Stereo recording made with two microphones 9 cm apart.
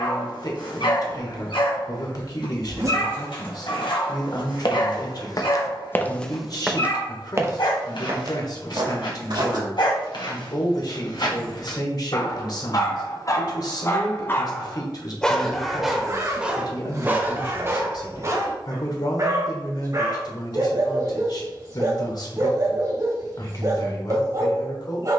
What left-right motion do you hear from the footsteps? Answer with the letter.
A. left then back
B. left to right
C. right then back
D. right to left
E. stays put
B.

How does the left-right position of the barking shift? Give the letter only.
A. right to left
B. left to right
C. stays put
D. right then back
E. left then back
B.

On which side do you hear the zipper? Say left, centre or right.
right.